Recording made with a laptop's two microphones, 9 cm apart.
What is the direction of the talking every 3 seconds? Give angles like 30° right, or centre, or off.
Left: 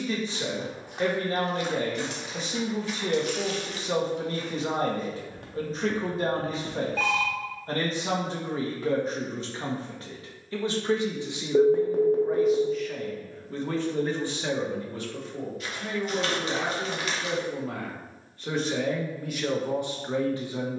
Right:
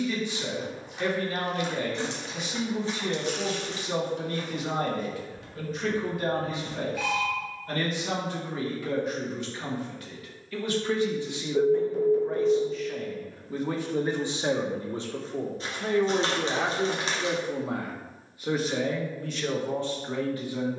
30° left, 30° left, 30° left, 20° left, 10° right, 30° right, 10° left.